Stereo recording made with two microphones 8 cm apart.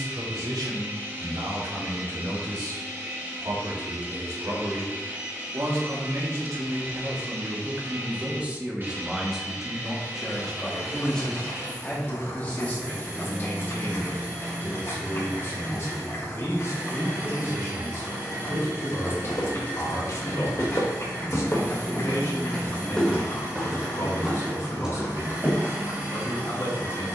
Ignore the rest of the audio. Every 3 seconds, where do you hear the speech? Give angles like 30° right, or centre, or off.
80° right, 60° right, 30° right, 10° left, 30° left, 40° left, 40° left, 40° left, 40° left.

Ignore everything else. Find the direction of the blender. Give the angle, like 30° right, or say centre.
40° right.